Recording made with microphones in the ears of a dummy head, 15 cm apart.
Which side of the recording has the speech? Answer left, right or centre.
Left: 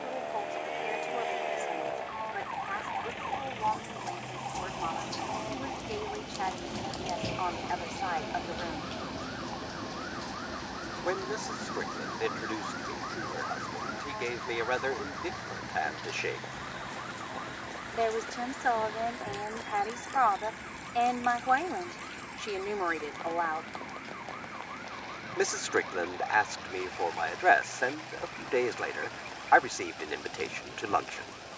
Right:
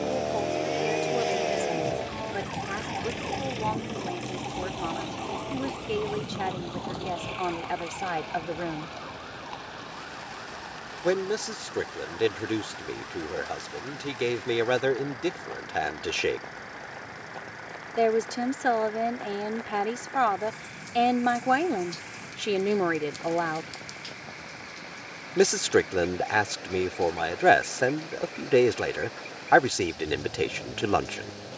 right.